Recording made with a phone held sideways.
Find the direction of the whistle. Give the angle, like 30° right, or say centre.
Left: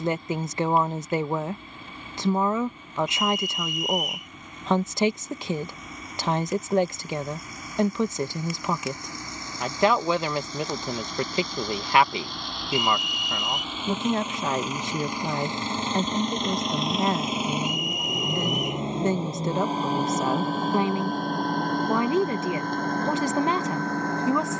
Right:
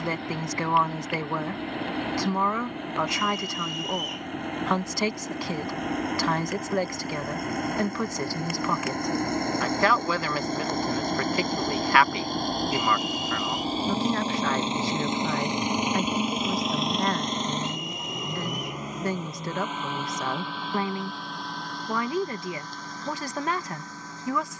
30° right.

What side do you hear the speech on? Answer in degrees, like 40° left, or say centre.
20° left.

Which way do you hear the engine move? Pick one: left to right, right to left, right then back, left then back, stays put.
right to left.